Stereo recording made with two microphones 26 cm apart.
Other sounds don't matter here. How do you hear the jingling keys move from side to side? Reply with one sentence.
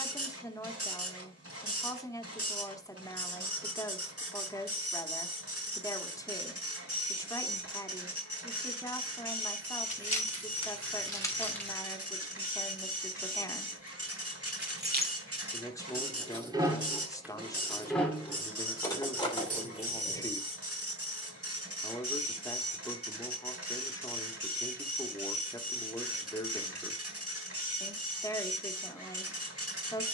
You can hear the jingling keys go right and come back.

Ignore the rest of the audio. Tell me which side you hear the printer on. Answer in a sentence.
You can hear the printer on the right.